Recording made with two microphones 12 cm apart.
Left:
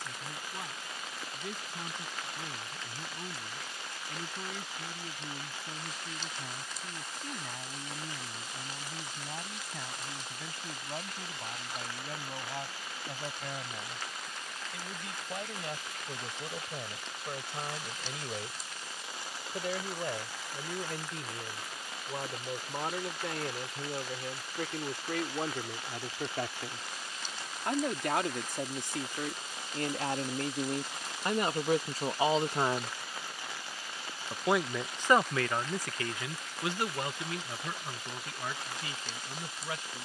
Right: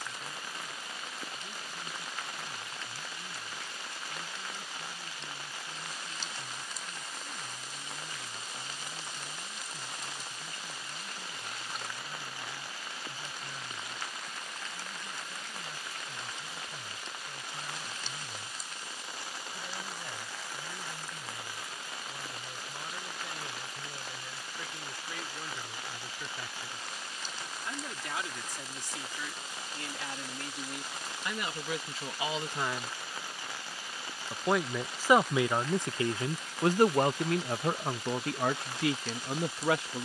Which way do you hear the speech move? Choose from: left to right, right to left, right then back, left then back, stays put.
left to right.